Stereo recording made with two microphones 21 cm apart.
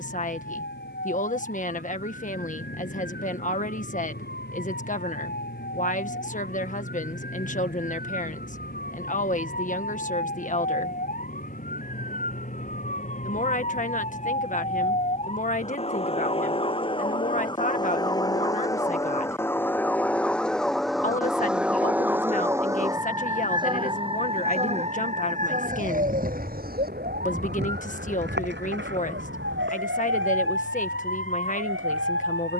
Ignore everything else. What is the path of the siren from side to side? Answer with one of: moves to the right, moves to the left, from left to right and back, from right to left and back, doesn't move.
moves to the right.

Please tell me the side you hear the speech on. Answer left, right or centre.
left.